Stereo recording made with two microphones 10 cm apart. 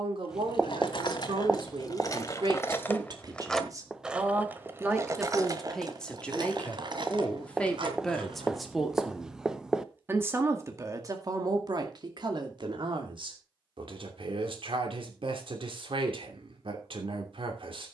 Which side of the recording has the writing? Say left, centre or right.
centre.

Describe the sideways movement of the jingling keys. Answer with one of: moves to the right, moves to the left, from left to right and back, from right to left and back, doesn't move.
moves to the right.